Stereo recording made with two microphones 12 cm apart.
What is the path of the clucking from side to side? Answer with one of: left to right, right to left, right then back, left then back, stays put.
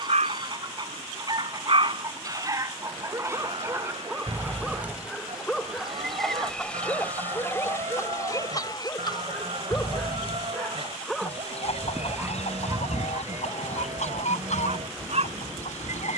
right to left.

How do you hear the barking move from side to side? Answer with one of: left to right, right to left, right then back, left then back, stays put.
left then back.